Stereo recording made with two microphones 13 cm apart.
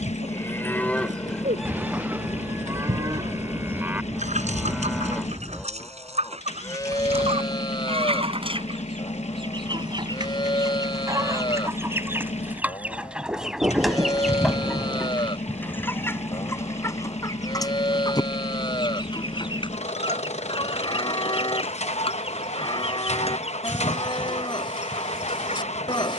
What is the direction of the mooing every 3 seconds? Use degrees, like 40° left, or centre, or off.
centre, 10° right, 30° left, 40° left, 40° left, 40° left, 40° left, 40° left, 40° left.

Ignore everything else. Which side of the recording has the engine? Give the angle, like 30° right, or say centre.
60° left.